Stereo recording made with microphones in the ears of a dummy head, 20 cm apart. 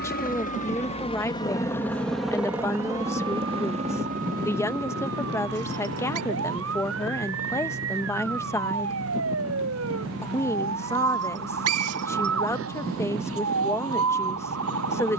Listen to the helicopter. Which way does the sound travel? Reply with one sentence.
In this clip you hear the helicopter go from the left side to the right.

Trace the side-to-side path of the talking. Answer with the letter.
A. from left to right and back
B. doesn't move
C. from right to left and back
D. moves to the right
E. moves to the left
B.